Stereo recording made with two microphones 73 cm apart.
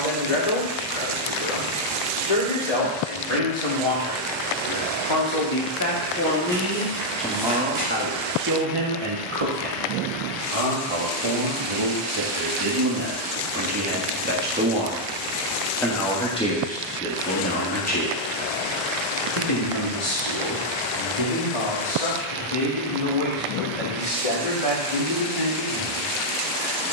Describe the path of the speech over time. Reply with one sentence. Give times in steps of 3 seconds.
In this clip you hear the speech on the left from 0 s, in the centre from 6 s, on the right from 9 s, in the centre from 15 s and on the left from 18 s.